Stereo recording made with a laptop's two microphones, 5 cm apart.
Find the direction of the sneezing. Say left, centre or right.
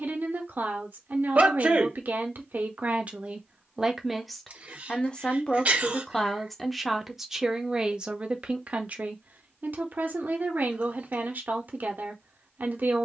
right.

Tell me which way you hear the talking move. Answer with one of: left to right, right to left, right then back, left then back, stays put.
left then back.